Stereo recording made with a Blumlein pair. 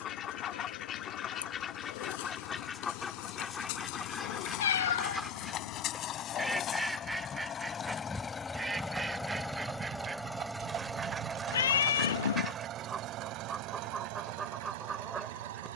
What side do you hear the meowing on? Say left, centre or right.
left.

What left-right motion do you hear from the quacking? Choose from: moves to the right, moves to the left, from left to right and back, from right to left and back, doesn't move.
moves to the right.